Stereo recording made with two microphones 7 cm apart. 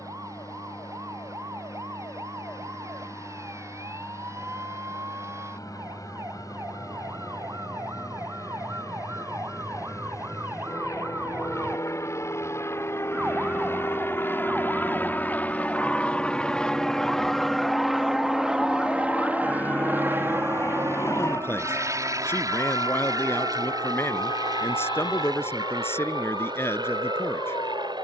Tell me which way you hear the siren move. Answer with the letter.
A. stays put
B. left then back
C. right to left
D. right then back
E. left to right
C.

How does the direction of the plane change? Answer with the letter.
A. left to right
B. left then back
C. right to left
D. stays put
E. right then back
A.